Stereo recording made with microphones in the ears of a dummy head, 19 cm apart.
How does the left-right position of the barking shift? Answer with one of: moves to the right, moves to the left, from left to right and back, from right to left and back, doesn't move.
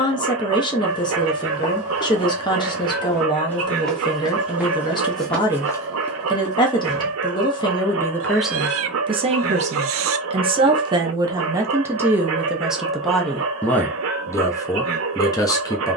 doesn't move.